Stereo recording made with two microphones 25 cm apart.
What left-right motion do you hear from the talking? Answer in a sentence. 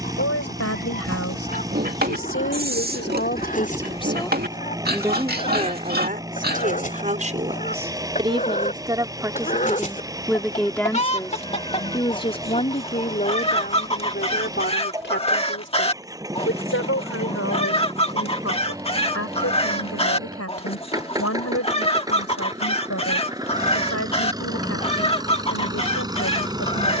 You can hear the talking go right and come back.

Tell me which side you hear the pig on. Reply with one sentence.
You can hear the pig on the right.